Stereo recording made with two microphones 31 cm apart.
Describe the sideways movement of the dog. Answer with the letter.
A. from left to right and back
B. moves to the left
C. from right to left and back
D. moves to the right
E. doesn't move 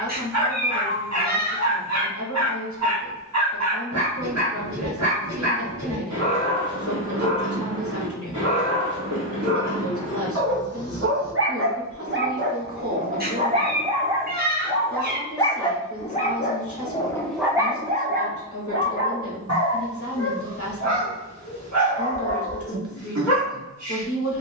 C.